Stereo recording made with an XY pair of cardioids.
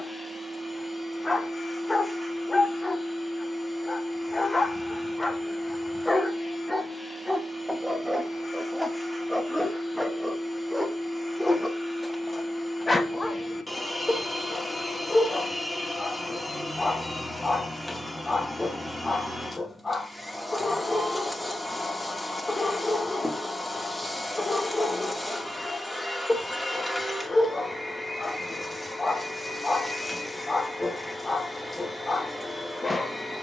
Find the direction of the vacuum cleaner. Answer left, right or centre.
centre.